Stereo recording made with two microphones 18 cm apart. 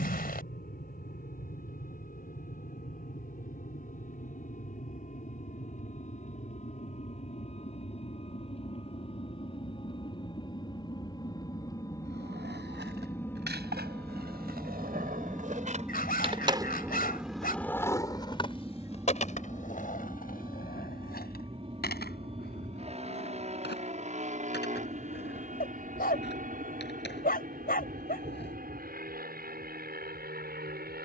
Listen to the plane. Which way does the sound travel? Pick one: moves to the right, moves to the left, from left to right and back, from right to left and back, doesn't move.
moves to the right.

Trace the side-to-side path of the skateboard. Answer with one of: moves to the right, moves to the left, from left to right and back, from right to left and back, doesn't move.
moves to the left.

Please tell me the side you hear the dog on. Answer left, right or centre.
left.